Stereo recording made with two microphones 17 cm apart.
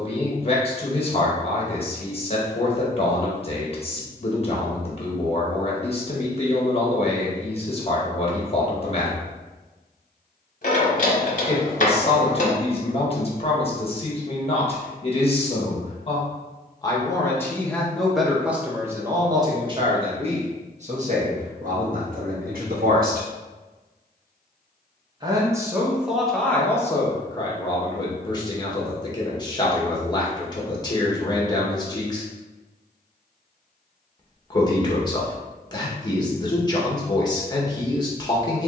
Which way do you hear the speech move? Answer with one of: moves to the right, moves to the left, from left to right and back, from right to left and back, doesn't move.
from left to right and back.